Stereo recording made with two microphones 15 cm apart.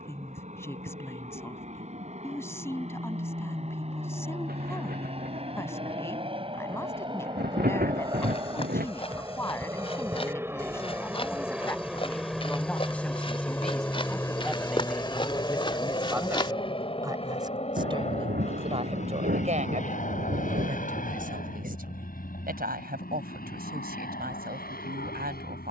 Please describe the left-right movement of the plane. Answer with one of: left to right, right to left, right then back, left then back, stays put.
right to left.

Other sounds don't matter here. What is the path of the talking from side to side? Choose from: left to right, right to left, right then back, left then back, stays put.
left to right.